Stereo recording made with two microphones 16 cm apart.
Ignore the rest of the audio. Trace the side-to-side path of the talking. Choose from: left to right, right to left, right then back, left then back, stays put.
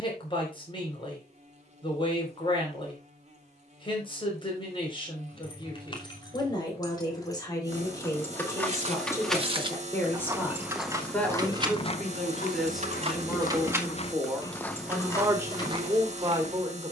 left to right.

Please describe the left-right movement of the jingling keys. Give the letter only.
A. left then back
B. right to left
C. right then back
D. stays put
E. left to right
C.